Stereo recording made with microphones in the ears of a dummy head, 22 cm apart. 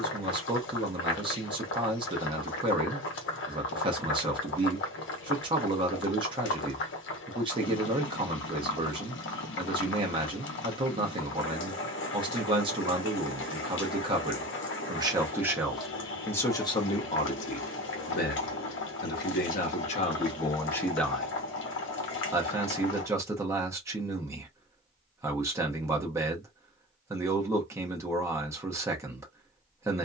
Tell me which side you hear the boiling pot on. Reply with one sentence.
You can hear the boiling pot on the left.